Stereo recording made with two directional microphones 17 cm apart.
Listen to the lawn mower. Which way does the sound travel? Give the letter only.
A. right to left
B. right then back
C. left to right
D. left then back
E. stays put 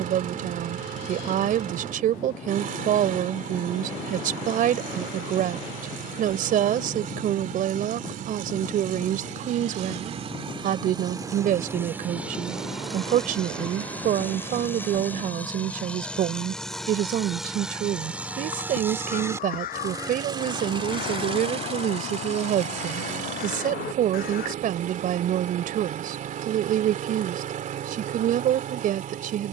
D.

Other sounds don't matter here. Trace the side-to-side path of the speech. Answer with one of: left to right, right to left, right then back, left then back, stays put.
stays put.